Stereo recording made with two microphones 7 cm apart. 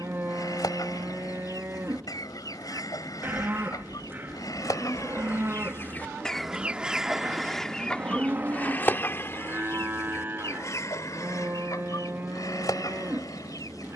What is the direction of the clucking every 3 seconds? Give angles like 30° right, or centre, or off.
60° left, 50° left, 10° left, 40° left, 60° left.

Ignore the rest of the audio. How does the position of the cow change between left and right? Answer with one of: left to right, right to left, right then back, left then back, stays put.
stays put.